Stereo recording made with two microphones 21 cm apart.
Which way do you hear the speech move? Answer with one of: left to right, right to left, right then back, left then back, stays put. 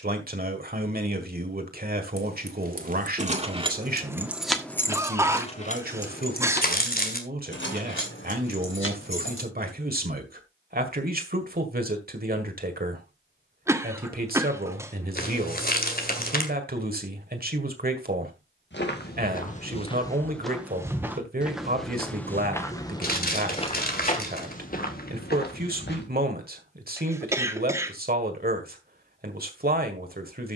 stays put.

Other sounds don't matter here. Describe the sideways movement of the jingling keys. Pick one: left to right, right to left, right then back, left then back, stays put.
right to left.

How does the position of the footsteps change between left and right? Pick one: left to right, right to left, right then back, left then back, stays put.
right then back.